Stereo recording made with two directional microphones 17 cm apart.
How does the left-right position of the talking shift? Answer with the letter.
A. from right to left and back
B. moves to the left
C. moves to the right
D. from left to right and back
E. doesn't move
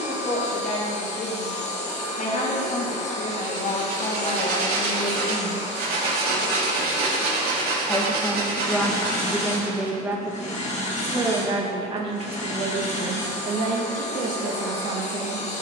C.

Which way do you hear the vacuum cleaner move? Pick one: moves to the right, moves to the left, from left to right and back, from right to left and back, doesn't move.
doesn't move.